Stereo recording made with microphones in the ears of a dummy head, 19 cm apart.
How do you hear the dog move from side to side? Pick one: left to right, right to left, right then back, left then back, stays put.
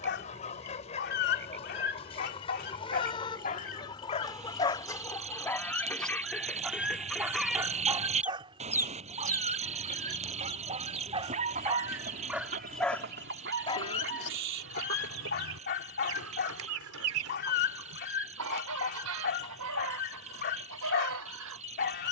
right then back.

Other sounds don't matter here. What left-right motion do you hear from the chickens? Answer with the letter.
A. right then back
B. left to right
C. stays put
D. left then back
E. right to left
B.